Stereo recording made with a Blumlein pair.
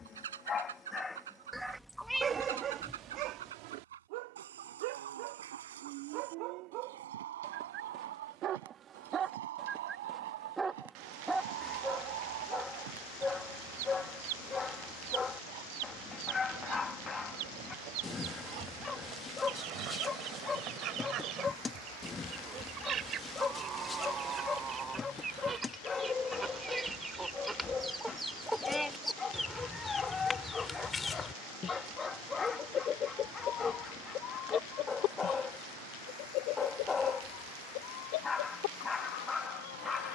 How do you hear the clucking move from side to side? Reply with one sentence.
You can hear the clucking move from right to left.